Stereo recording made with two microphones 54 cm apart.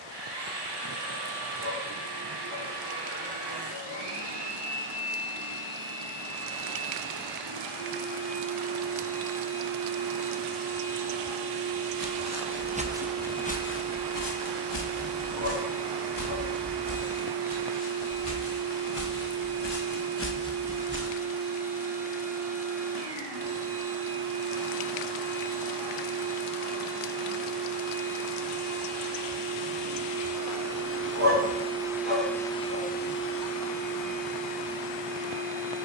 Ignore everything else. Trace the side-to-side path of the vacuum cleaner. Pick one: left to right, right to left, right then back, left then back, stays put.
right to left.